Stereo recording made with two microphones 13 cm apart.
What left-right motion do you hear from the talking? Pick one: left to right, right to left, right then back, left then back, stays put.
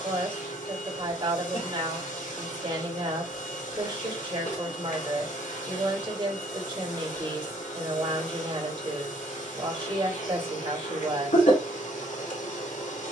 stays put.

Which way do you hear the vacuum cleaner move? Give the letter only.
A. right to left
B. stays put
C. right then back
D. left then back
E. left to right
B.